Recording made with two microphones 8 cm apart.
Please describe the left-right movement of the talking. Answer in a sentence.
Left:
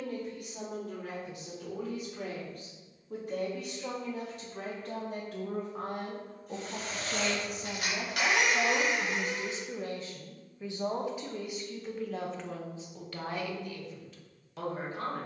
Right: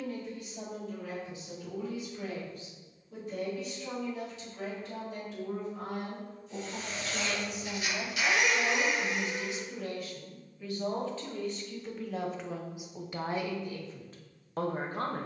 In this clip you hear the talking travel towards the right.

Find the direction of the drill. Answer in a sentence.
In this clip you hear the drill on the left.